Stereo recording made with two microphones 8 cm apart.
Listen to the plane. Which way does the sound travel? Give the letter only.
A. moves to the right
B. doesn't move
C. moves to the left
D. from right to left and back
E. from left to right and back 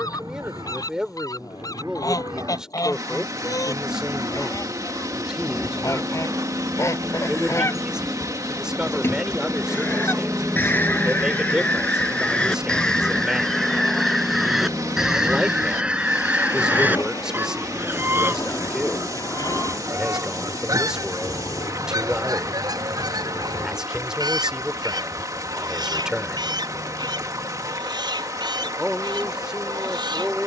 C.